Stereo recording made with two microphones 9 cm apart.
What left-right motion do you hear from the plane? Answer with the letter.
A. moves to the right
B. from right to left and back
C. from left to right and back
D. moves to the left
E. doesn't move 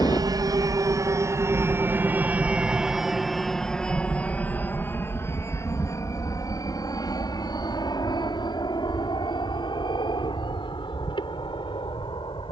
D.